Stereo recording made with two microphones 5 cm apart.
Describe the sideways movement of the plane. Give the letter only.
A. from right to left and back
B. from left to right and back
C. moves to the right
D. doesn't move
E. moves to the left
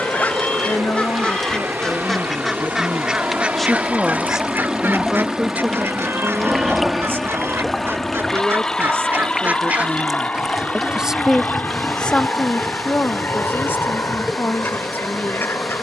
E.